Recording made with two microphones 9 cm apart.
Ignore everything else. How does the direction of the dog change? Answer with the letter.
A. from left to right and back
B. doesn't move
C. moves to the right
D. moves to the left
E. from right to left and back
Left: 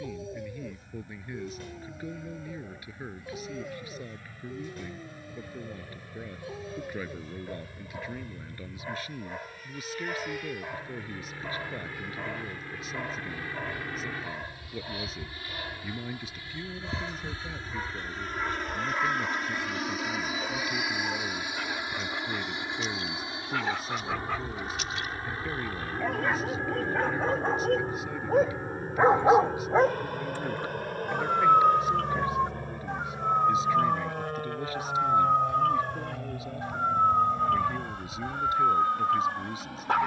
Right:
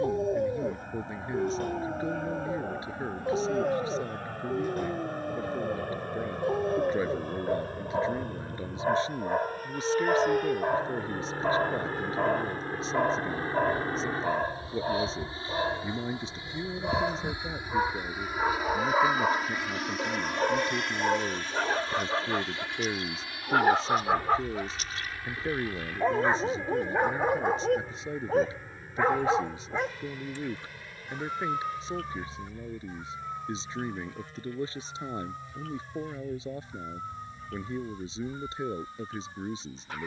D.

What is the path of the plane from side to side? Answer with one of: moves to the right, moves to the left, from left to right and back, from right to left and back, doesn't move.
moves to the left.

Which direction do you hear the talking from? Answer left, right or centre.
right.